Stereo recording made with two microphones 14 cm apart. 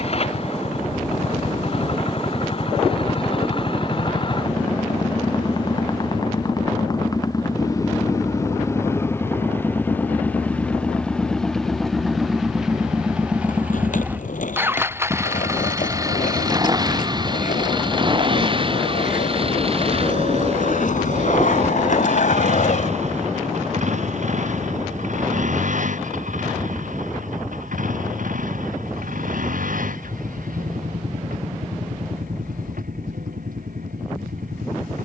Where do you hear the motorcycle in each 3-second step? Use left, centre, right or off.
left, left, left, centre, centre, right, right, right, right, right, right, right.